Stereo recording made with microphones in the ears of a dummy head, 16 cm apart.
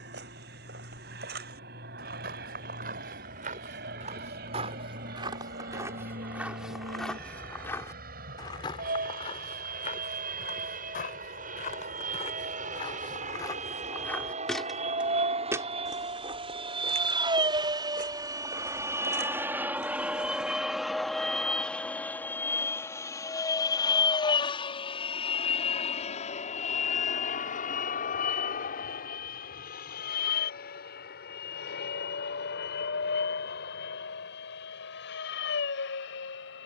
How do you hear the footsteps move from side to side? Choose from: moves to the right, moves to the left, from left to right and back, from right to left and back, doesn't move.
from right to left and back.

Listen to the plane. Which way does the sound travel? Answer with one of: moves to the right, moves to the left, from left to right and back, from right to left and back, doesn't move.
moves to the left.